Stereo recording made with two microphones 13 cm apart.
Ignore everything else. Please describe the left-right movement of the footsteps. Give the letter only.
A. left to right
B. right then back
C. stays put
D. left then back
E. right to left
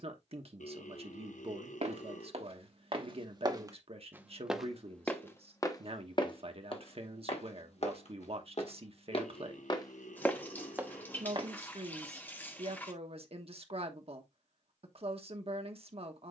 D.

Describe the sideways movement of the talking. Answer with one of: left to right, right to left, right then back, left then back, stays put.
stays put.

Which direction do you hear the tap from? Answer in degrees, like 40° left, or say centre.
10° left.